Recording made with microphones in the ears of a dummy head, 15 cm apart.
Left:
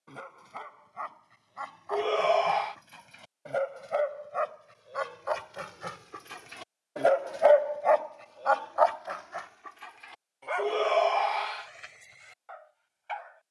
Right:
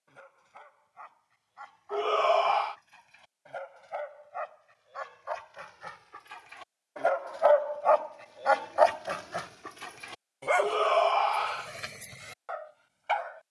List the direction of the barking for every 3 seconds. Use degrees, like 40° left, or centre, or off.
80° left, 70° left, 20° left, 60° right, 70° right.